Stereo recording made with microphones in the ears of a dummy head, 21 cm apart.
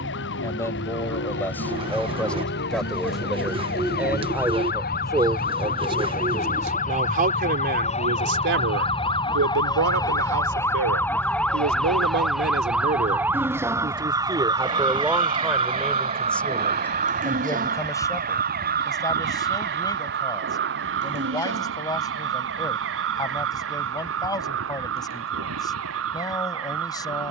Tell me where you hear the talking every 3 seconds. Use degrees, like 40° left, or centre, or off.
10° left, 10° right, 40° right, 70° right, 30° right, centre, 20° left, 20° left, 20° left.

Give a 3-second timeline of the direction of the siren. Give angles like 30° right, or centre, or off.
60° left, 50° left, 30° left, 10° left, 10° right, 30° right, 50° right, 60° right, 60° right.